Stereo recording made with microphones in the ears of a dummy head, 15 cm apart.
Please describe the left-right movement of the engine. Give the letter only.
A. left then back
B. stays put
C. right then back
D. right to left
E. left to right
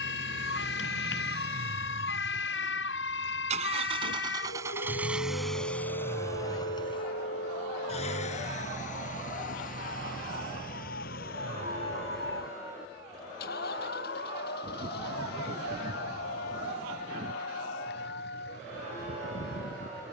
D.